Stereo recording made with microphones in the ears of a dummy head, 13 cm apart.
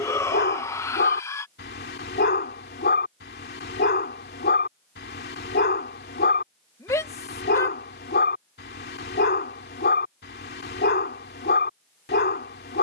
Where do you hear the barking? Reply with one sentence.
You can hear the barking on the left.